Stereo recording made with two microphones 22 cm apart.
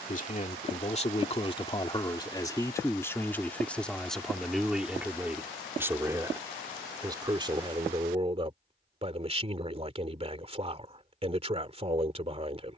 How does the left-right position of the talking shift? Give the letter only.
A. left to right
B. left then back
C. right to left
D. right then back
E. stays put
A.